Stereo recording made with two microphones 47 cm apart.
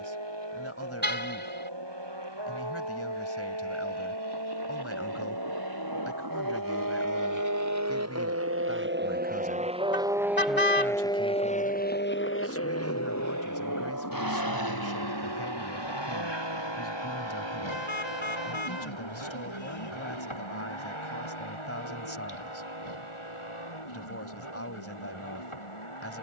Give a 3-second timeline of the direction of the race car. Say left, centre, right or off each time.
right, right, right, centre, left, left, left, left, left.